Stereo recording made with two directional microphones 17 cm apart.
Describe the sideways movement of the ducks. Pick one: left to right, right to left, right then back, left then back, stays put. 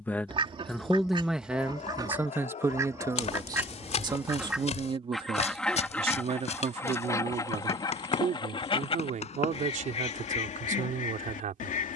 right to left.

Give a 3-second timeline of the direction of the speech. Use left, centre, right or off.
centre, right, right, right.